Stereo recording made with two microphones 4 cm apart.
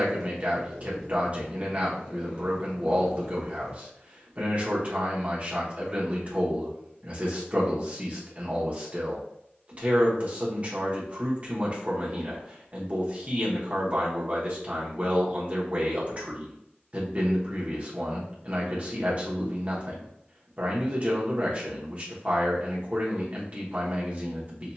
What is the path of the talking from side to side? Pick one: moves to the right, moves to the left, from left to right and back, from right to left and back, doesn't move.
doesn't move.